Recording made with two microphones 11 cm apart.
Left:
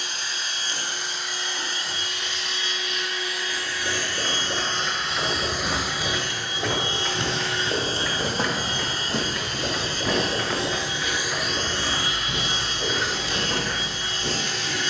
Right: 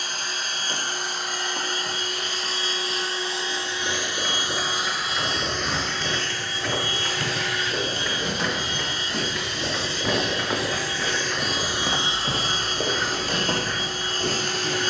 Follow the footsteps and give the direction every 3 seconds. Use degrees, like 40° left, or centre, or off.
off, 60° left, 50° left, 20° right, 70° right.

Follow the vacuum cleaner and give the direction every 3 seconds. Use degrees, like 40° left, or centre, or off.
40° right, 10° right, 30° left, 20° left, 40° right.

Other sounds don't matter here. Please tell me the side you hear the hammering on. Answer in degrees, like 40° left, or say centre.
centre.